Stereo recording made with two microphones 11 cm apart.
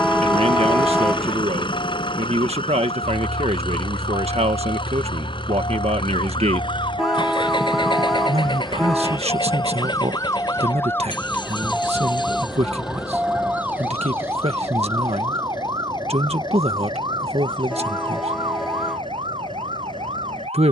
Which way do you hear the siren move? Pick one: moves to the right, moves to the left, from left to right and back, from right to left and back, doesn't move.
moves to the right.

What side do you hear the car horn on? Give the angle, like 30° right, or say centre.
centre.